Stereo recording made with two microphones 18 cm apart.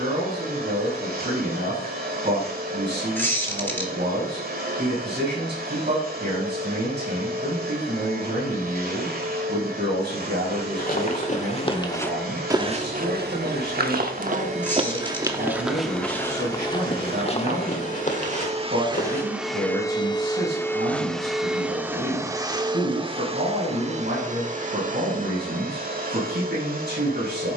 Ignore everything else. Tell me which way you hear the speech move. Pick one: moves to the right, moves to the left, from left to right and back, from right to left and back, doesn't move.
doesn't move.